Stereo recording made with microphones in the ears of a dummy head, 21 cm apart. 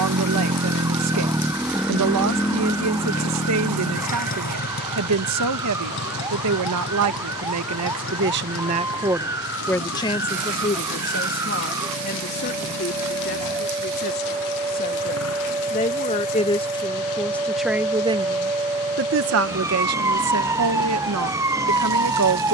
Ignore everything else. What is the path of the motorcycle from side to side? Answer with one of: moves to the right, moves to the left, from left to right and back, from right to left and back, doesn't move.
moves to the left.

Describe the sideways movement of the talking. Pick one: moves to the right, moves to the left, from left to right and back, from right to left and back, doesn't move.
from right to left and back.